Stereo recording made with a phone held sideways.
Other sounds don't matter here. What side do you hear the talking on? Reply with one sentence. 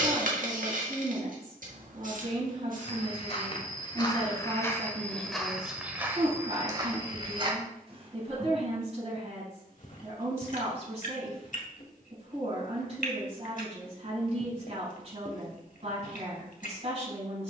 In this clip you hear the talking on the right.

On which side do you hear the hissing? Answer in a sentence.
In this clip you hear the hissing on the right.